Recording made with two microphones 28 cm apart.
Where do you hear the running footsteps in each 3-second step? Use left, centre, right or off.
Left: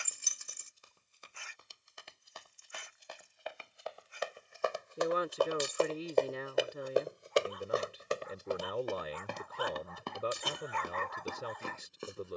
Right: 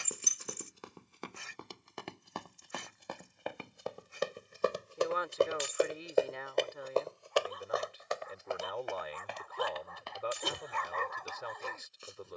right, right, left, left.